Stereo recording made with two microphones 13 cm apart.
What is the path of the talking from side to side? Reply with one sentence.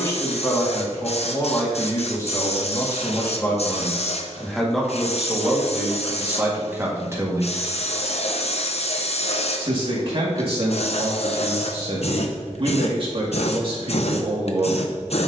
In this clip you hear the talking travel towards the right.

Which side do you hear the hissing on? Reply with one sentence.
You can hear the hissing on the left.